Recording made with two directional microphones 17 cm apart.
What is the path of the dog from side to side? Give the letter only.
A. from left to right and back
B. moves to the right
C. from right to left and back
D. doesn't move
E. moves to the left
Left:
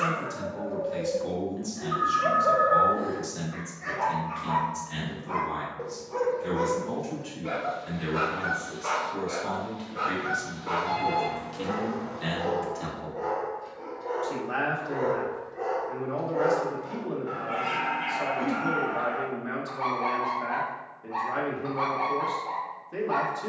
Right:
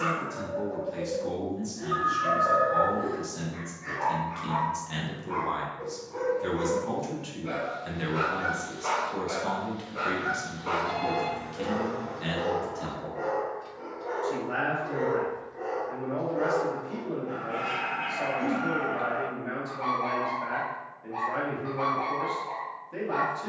A.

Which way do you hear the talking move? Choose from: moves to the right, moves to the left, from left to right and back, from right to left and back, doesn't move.
from left to right and back.